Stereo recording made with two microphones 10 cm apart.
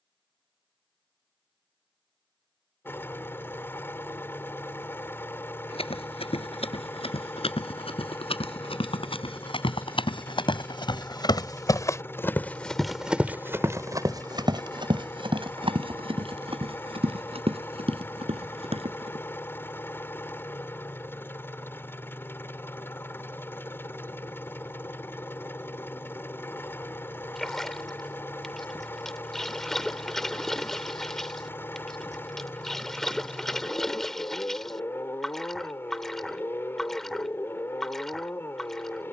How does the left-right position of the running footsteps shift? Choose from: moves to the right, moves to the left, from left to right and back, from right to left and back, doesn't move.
moves to the right.